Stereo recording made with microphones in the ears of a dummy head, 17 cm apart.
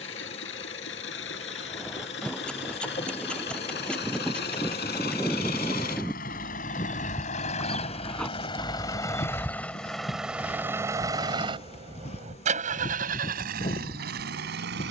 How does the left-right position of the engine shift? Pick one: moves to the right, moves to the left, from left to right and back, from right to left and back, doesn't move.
moves to the right.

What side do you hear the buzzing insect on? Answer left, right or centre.
left.